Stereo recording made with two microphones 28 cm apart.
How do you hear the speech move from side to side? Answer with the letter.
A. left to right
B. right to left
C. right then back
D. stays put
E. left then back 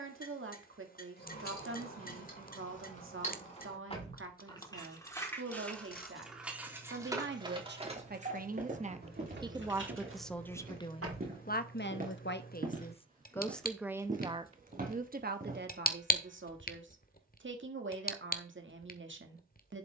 E.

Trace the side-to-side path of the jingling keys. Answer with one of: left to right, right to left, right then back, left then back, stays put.
left to right.